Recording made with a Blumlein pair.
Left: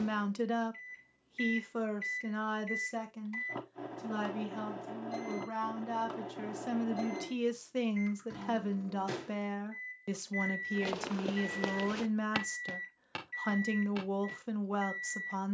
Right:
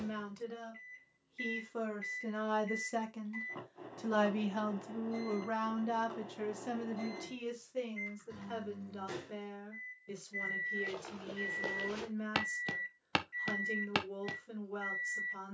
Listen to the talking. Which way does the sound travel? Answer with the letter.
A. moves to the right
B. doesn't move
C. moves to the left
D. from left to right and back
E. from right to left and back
D.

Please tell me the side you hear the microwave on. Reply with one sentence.
You can hear the microwave on the left.